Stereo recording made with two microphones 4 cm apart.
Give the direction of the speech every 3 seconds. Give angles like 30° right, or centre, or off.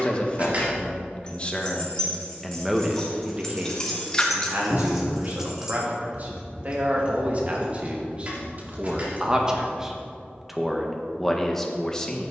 20° left, 40° right, 30° right, centre.